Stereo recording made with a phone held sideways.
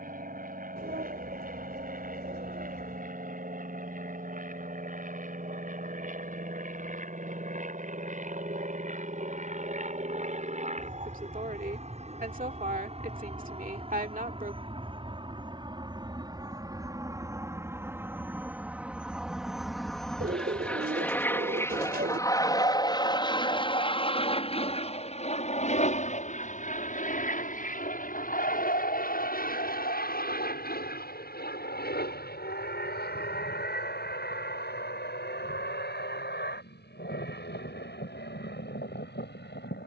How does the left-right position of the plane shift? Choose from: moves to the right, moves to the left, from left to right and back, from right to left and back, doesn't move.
moves to the left.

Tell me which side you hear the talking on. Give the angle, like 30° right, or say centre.
60° right.